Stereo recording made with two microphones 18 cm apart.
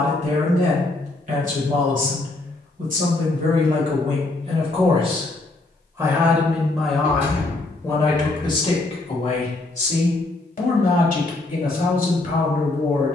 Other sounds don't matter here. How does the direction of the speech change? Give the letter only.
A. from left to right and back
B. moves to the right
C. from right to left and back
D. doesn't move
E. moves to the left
E.